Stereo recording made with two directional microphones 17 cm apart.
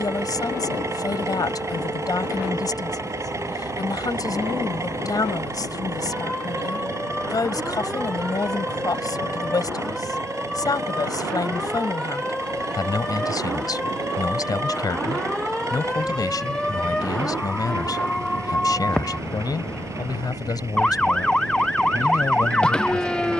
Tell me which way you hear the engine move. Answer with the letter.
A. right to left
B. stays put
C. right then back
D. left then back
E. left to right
B.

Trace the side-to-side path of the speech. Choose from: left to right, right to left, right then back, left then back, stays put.
stays put.